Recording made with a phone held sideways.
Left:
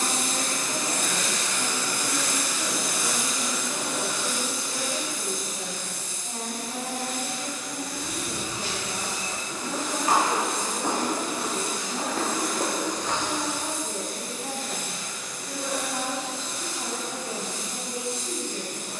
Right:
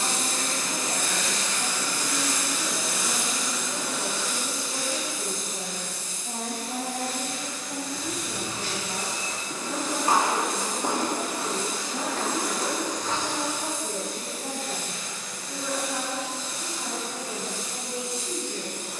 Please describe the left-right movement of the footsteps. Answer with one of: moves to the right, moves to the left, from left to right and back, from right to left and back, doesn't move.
moves to the left.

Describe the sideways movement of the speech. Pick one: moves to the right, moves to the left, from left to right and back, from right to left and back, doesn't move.
from left to right and back.